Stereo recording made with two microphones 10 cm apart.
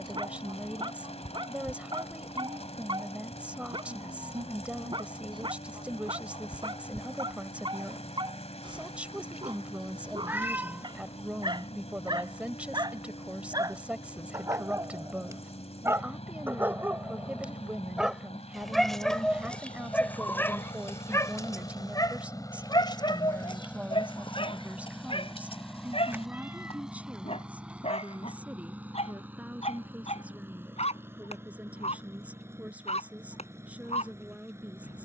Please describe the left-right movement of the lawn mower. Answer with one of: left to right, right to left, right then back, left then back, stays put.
left to right.